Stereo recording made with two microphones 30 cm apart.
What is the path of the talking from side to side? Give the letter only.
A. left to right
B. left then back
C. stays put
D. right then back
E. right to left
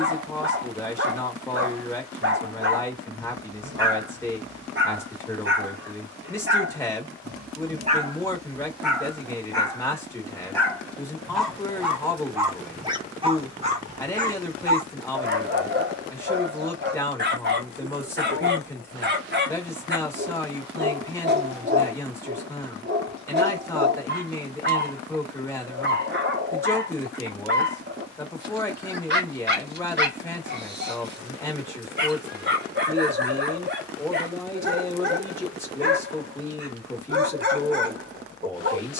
C.